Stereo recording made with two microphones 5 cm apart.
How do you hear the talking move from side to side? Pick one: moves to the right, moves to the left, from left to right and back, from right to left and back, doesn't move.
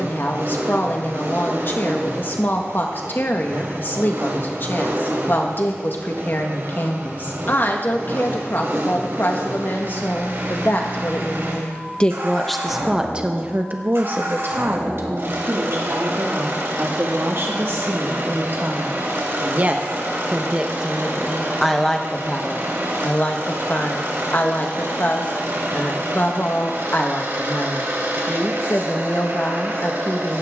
from left to right and back.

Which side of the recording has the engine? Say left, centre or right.
right.